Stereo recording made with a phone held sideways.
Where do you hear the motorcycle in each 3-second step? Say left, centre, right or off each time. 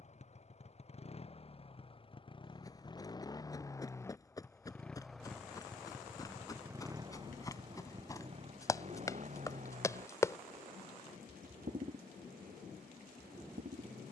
left, centre, right, right, right.